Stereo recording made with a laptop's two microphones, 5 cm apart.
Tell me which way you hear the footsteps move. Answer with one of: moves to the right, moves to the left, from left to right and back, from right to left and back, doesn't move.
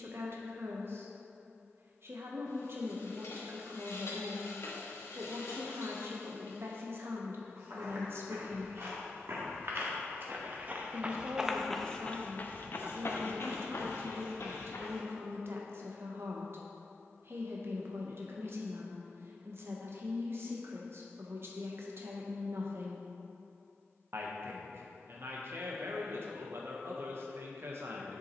moves to the left.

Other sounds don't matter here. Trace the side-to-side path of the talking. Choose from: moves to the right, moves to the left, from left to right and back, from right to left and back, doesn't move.
doesn't move.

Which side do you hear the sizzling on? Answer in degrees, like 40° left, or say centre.
70° left.